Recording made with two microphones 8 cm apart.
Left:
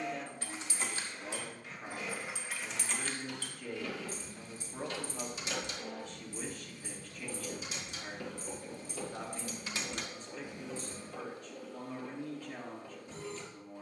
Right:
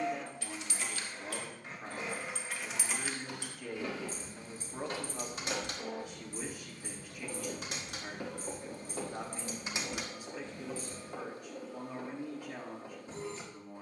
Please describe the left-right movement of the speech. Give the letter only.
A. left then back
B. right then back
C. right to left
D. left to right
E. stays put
E.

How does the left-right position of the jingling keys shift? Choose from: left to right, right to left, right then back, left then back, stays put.
right then back.